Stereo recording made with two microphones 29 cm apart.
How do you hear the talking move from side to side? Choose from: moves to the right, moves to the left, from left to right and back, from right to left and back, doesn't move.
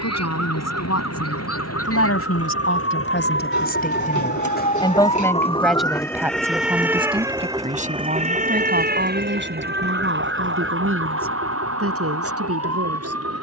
moves to the right.